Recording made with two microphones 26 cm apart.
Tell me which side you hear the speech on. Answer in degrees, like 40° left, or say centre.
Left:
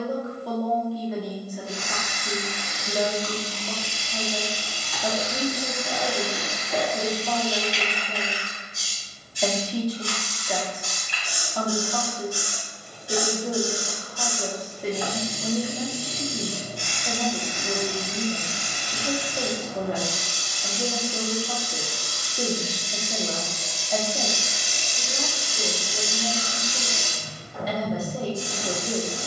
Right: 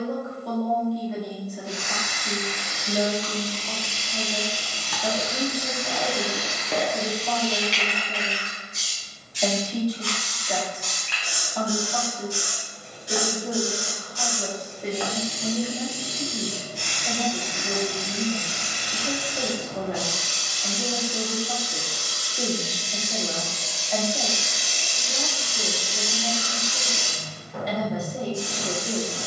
centre.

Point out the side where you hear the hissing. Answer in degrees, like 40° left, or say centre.
90° right.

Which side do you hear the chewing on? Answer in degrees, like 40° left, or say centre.
70° right.